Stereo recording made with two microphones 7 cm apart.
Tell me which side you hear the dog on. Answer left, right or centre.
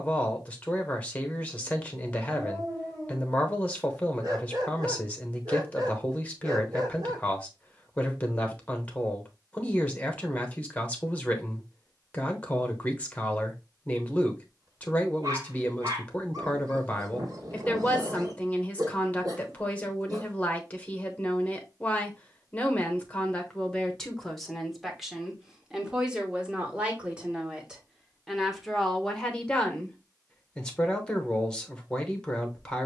right.